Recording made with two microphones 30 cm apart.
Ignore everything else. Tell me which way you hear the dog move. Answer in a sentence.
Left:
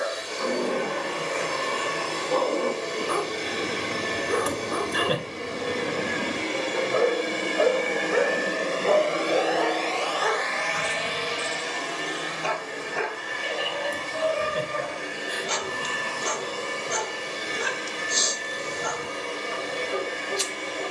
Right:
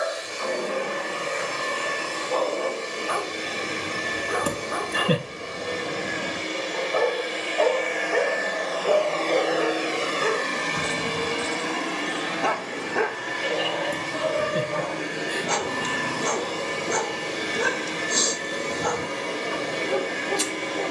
In this clip you hear the dog travel towards the right.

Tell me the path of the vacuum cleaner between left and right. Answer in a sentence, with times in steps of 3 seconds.
In this clip you hear the vacuum cleaner on the left from 0 s and on the right from 9 s.